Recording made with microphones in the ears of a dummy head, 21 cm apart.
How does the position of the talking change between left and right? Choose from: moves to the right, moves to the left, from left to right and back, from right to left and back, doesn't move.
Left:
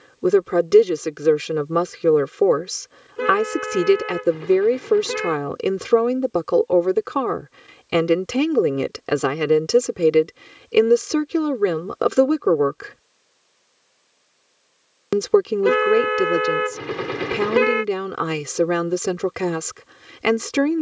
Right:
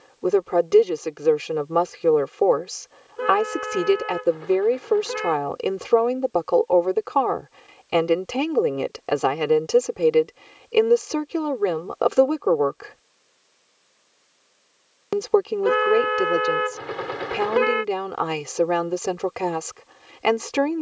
doesn't move.